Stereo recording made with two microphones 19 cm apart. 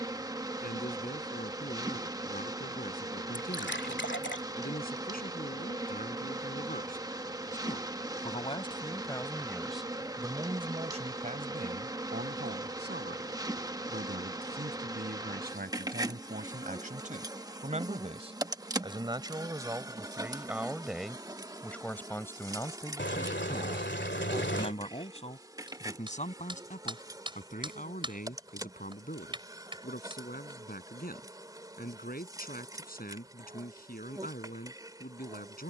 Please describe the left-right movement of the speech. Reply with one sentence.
In this clip you hear the speech go right and come back.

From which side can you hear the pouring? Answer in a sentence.
You can hear the pouring on the left.